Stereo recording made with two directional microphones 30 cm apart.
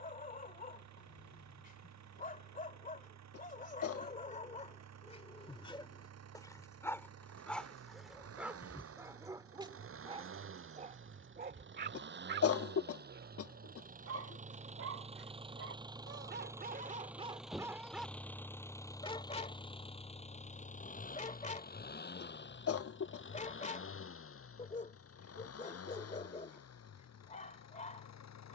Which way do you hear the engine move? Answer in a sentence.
In this clip you hear the engine go from the right side to the left.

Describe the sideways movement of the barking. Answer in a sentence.
You can hear the barking go right and come back.